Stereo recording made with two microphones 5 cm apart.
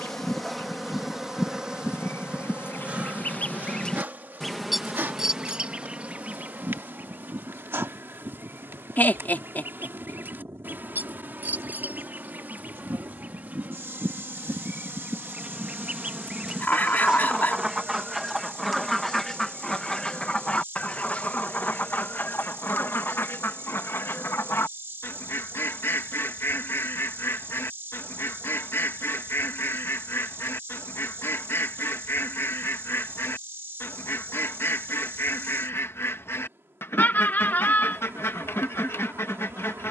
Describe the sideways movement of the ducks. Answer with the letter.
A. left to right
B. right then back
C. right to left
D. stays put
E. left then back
B.